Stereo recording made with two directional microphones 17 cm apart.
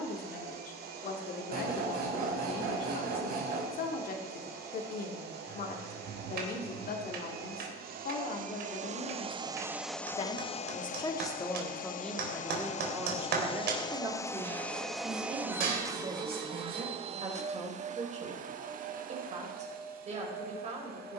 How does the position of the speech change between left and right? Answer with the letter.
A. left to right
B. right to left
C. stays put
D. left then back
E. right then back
A.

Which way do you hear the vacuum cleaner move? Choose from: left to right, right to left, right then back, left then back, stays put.
left then back.